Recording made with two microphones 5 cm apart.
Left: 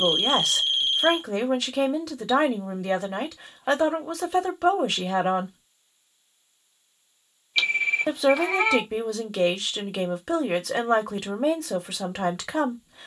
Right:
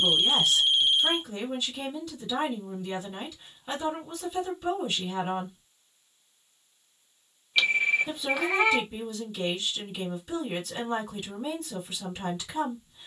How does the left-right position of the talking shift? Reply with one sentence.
In this clip you hear the talking stay in one place.